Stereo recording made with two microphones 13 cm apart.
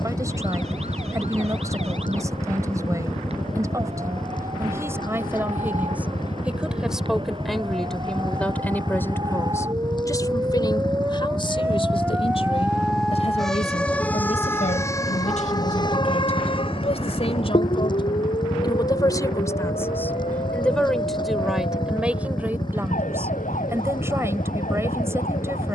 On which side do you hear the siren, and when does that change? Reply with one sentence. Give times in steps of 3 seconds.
In this clip you hear the siren on the right from 0 s, in the centre from 12 s and on the left from 15 s.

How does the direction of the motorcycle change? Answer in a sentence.
In this clip you hear the motorcycle stay put.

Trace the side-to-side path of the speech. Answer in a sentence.
You can hear the speech go left and come back.